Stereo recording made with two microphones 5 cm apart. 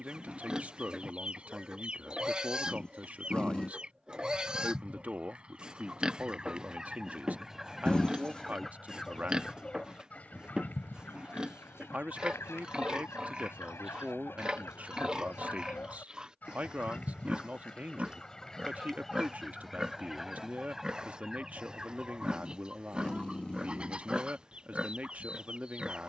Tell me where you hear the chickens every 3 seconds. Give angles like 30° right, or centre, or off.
20° right, 20° right, 10° right, 40° left, 60° left, 30° left, centre, 20° right, 20° right.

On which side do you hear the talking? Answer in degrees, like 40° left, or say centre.
30° right.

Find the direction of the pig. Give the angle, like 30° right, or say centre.
20° right.